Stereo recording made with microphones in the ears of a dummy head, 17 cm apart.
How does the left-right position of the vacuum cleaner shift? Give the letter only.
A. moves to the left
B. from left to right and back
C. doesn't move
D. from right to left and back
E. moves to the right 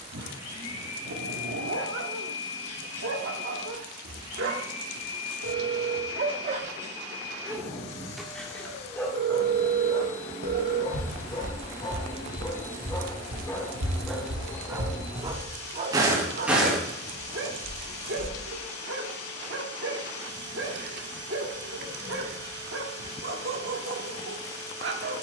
C.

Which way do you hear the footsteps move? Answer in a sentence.
You can hear the footsteps go right and come back.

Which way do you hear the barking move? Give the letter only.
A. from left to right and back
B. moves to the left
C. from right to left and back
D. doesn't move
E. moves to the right
C.